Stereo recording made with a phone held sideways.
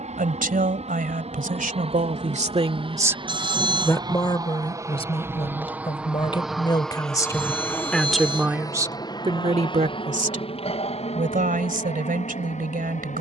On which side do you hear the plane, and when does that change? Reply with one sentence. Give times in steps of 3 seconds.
In this clip you hear the plane on the right from 0 s, in the centre from 6 s and on the left from 9 s.